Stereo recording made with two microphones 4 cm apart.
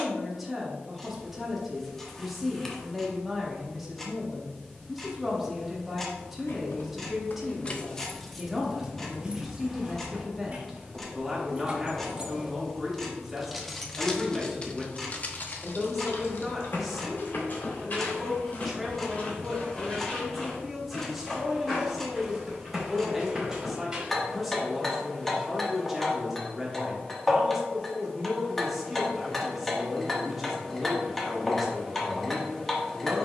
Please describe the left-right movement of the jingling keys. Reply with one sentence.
You can hear the jingling keys go right and come back.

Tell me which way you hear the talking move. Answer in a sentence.
You can hear the talking stay put.